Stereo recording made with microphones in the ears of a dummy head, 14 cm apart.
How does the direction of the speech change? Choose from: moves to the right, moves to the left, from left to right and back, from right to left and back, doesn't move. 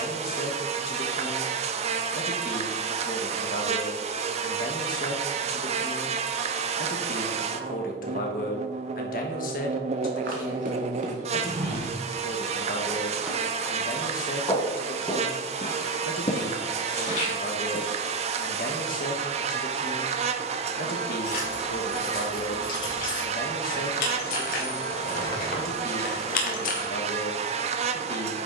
doesn't move.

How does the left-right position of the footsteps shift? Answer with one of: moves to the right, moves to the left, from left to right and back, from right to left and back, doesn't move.
moves to the left.